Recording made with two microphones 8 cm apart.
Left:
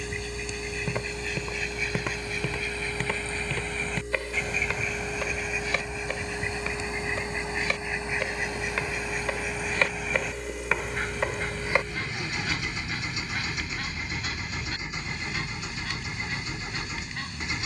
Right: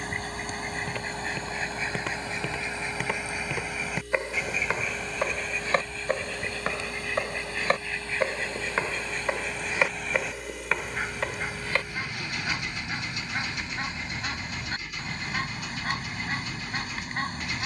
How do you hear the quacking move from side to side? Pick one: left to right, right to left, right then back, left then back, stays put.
left then back.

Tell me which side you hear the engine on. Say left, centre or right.
left.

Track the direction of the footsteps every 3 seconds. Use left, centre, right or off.
centre, right, right, centre, off, off.